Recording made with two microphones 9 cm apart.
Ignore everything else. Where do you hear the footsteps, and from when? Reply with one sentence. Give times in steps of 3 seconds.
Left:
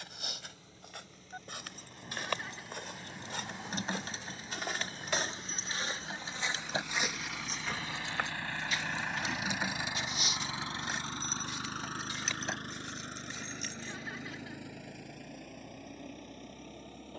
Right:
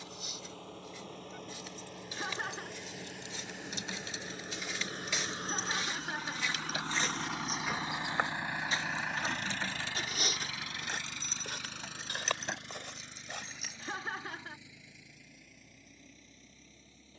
In this clip you hear the footsteps on the left from 0 s, in the centre from 6 s, on the right from 9 s and not at all from 15 s.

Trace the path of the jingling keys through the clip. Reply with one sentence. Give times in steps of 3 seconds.
In this clip you hear the jingling keys on the left from 0 s, in the centre from 9 s and not at all from 15 s.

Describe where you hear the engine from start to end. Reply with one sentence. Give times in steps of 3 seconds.
You can hear the engine on the right from 0 s and on the left from 9 s.